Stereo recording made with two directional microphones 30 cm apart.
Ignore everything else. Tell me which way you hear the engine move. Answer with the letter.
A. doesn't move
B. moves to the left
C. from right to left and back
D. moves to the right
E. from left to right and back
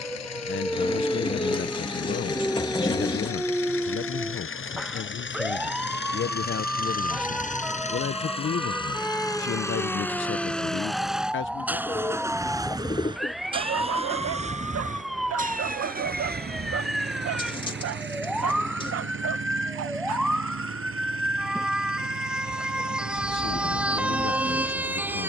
D.